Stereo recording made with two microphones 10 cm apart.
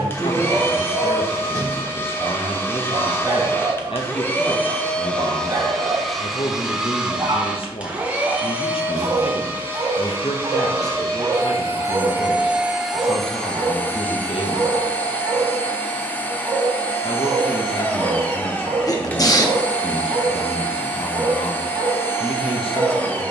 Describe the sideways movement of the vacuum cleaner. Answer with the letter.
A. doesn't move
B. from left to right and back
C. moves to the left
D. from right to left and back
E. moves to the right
B.